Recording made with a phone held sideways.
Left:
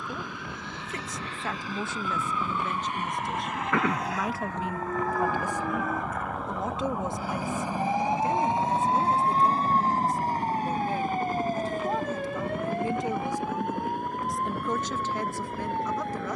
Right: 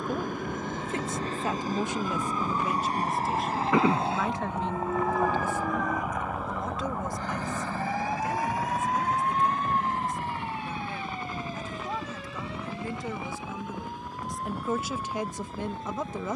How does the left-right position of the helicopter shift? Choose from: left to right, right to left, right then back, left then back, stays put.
right to left.